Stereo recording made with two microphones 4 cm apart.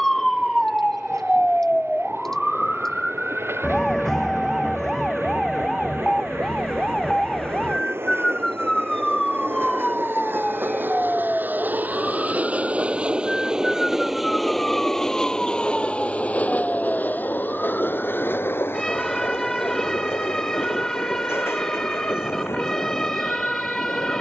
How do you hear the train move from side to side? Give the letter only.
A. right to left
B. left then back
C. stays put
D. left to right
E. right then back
A.